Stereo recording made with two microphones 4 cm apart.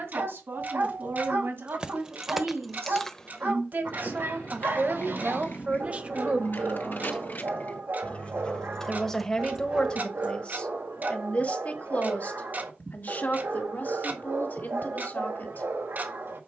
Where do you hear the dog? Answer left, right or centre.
right.